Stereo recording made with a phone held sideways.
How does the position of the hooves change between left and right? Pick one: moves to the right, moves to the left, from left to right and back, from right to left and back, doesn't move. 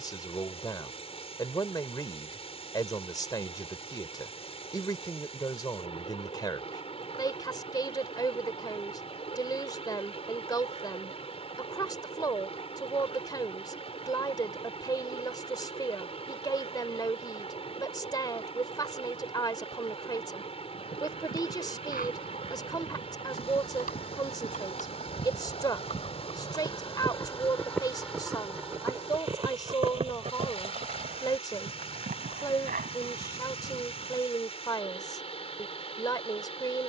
moves to the right.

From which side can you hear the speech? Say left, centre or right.
left.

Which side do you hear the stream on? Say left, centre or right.
left.